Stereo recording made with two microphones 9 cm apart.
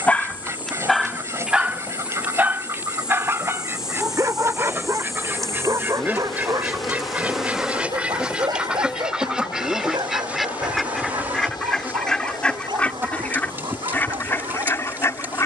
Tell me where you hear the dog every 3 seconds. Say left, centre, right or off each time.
centre, right, right, right, right.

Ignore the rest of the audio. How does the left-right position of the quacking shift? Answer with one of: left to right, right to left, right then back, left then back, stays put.
right to left.